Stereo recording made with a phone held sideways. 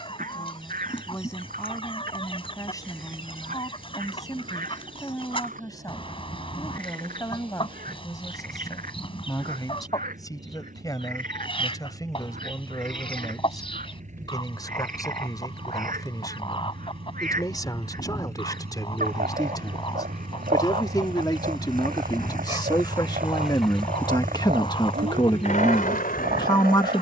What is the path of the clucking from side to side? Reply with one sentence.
You can hear the clucking stay put.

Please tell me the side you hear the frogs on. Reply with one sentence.
In this clip you hear the frogs on the right.